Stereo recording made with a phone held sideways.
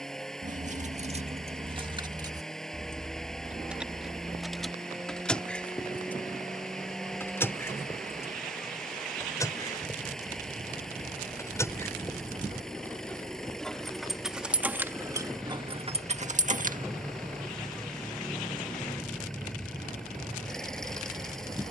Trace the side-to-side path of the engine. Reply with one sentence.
You can hear the engine stay in one place.